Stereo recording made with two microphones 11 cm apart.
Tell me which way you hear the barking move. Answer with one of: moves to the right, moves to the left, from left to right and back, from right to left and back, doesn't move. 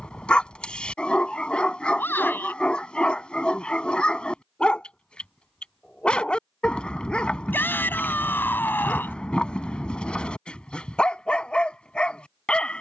doesn't move.